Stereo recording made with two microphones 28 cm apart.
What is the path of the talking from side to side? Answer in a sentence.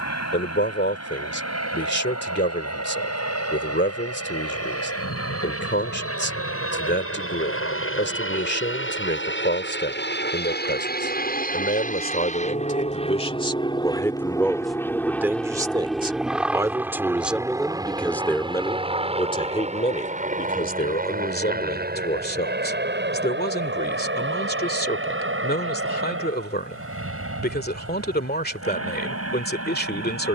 You can hear the talking go right and come back.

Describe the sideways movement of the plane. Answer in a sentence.
You can hear the plane go from the left side to the right.